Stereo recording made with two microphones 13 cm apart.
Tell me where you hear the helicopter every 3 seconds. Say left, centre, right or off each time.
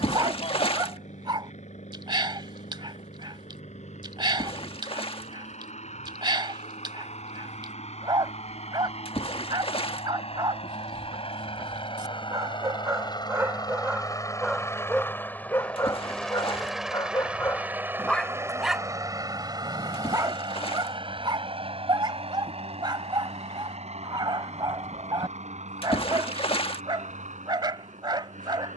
left, left, left, left, left, centre, right, right, right, right.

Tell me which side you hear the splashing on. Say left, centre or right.
left.